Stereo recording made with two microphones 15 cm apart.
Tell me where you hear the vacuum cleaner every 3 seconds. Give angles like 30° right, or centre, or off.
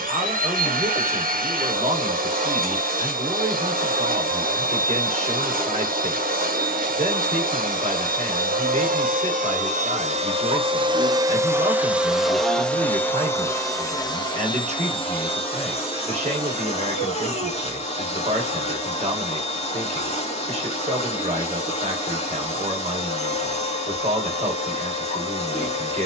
60° right, 60° right, 60° right, 40° right, 20° left, 40° left, 40° left, 40° left, 40° left.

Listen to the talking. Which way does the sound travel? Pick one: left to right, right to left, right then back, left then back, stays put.
stays put.